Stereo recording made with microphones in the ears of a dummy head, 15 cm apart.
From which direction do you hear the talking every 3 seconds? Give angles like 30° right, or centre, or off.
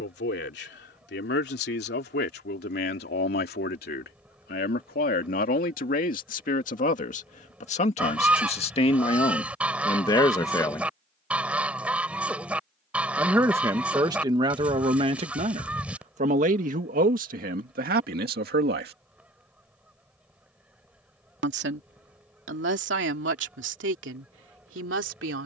60° left, 50° left, 40° left, 20° left, 20° right, 40° right, 60° right, 70° right, 70° right.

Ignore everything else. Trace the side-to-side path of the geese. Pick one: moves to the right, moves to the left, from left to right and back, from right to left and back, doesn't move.
doesn't move.